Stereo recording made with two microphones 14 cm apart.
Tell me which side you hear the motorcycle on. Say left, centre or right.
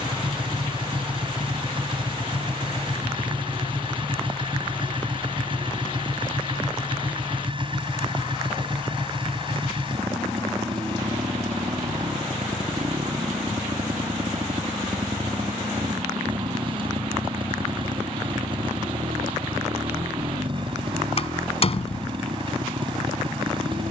right.